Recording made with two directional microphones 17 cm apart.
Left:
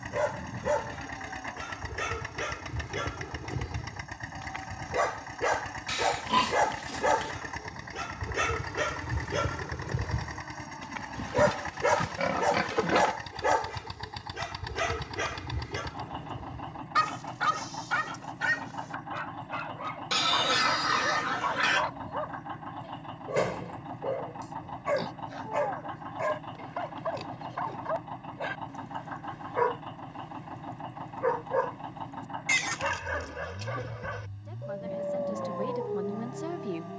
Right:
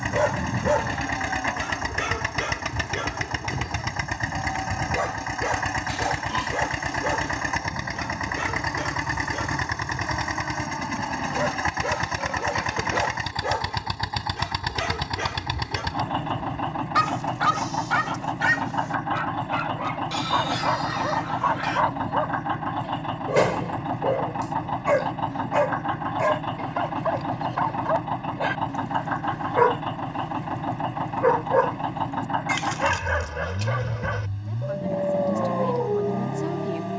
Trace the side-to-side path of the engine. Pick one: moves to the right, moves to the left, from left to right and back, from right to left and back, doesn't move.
doesn't move.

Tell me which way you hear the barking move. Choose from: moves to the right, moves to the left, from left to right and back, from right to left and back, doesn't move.
from right to left and back.